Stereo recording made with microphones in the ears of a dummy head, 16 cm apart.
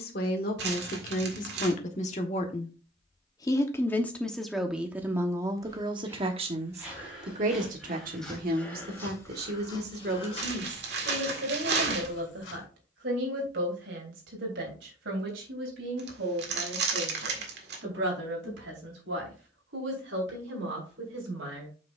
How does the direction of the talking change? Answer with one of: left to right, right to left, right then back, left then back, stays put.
left to right.